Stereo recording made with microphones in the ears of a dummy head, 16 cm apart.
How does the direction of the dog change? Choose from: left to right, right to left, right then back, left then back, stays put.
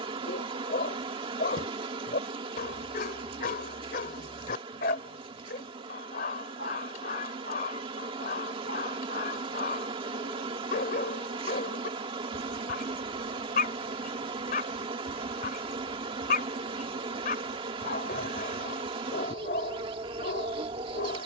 stays put.